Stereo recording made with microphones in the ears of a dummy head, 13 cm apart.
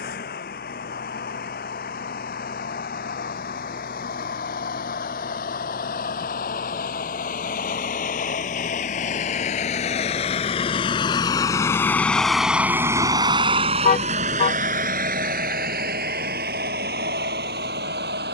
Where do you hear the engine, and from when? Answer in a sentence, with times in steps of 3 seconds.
You can hear the engine on the left from 0 s and on the right from 12 s.